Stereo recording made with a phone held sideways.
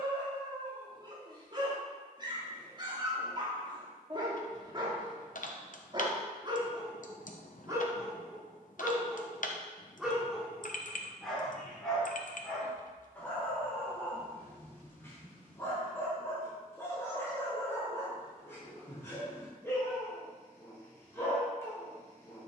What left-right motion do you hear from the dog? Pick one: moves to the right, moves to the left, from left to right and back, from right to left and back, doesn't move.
moves to the left.